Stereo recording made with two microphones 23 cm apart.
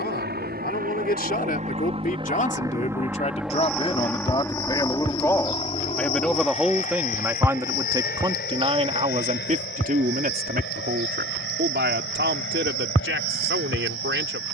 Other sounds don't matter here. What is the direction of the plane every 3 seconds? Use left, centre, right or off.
right, centre, left, left, left.